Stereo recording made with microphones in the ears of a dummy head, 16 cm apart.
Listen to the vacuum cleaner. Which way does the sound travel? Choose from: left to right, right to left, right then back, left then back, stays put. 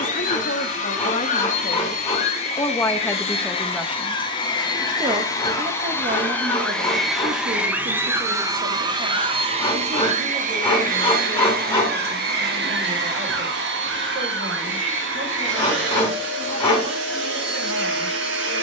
left to right.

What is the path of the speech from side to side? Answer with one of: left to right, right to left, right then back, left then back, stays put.
left to right.